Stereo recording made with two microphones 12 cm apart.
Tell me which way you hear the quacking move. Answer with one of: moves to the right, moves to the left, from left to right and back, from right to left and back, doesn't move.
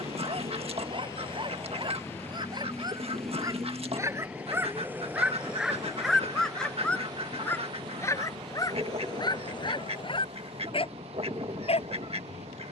doesn't move.